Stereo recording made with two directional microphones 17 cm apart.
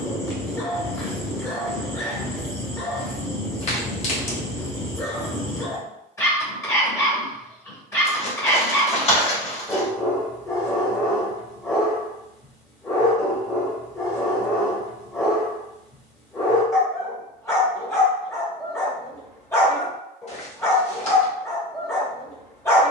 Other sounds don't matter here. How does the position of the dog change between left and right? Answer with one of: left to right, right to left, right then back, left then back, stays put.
stays put.